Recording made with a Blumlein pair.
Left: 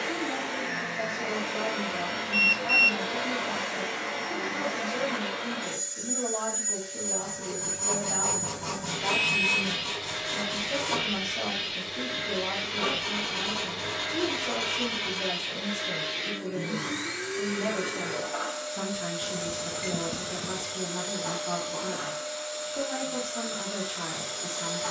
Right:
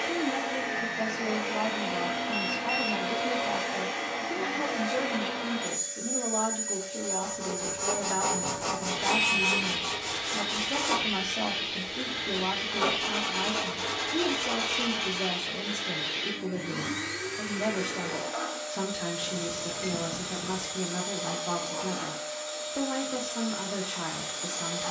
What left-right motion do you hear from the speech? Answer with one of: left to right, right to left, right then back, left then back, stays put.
stays put.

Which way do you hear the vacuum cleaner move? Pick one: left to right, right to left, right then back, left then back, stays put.
stays put.